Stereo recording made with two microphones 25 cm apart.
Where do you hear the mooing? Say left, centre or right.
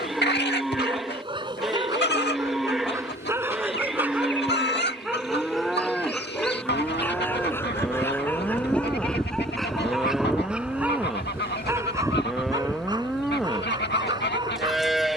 centre.